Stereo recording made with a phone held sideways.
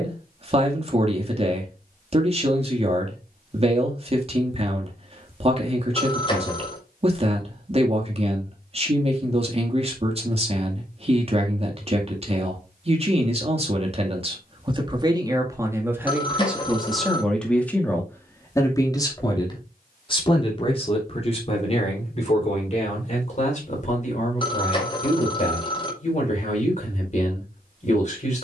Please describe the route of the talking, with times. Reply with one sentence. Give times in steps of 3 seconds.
In this clip you hear the talking on the right from 0 s, in the centre from 15 s and on the left from 18 s.